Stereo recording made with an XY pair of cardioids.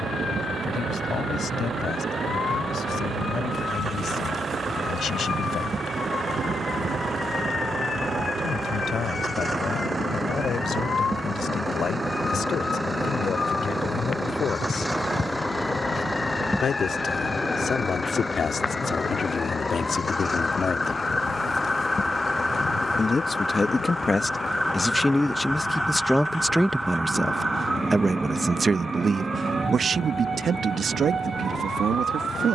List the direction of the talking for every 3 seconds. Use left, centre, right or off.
left, left, left, left, left, left, left, left, centre, right, right.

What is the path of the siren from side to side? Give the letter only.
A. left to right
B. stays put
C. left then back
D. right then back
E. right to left
A.